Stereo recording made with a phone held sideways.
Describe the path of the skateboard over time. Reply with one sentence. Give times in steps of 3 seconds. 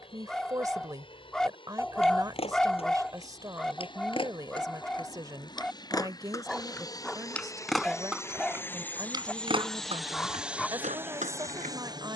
You can hear the skateboard on the left from 0 s, in the centre from 6 s and on the right from 9 s.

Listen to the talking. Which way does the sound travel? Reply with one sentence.
You can hear the talking stay in one place.